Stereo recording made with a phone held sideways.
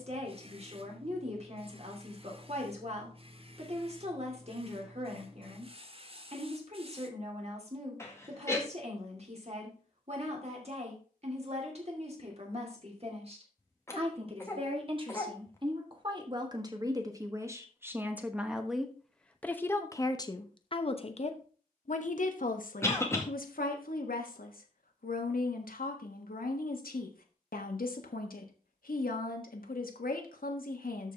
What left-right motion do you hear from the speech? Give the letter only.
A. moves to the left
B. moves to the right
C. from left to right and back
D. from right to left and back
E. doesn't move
A.